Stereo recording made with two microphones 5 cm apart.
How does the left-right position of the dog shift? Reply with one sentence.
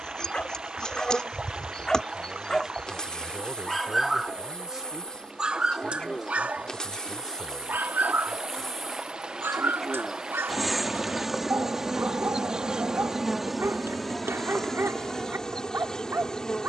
You can hear the dog move to the right.